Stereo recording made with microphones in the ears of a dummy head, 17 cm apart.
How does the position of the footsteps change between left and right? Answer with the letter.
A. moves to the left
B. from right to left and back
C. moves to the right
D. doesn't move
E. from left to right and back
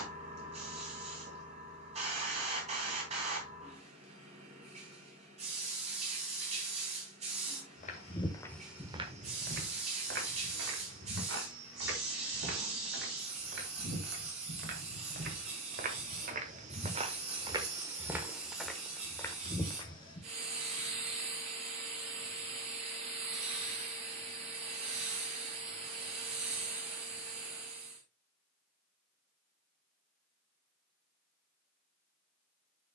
E.